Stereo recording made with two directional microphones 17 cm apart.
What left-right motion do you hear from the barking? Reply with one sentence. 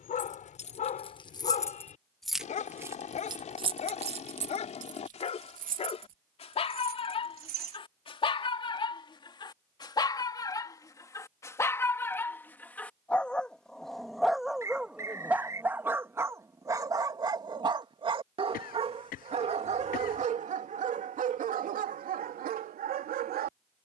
You can hear the barking move from left to right.